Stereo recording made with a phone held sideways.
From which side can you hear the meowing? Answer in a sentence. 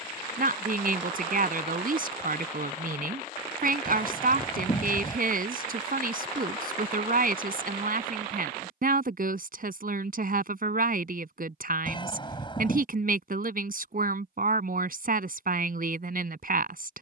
In this clip you hear the meowing on the left.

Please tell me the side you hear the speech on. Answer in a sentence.
In this clip you hear the speech on the right.